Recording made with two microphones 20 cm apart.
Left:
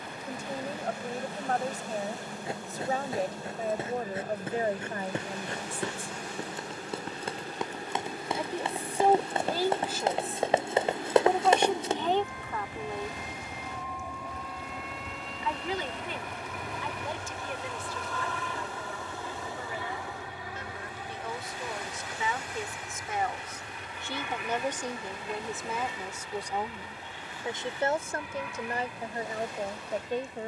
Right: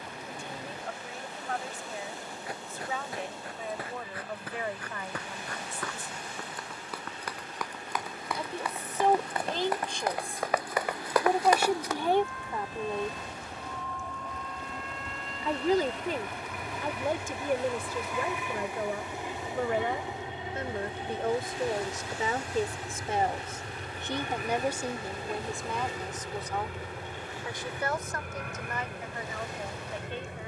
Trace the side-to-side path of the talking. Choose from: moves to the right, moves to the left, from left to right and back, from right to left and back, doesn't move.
from left to right and back.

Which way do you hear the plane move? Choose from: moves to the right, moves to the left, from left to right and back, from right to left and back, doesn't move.
moves to the right.